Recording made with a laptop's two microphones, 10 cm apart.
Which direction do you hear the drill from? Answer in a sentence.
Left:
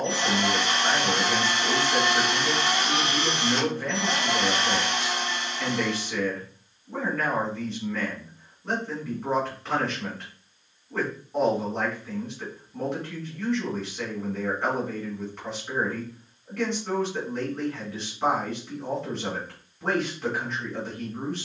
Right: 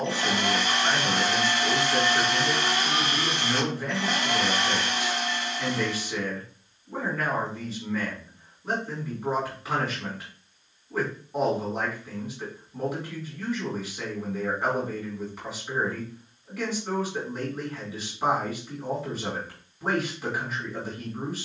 You can hear the drill on the left.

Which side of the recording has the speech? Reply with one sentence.
In this clip you hear the speech in the centre.